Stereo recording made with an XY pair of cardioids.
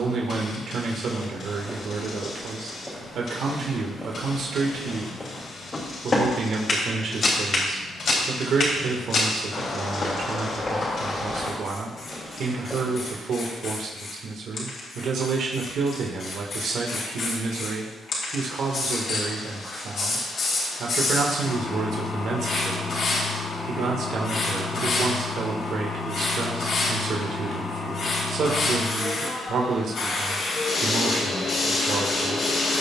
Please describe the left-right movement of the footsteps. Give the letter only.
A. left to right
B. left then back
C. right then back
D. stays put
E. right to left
B.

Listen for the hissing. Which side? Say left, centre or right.
left.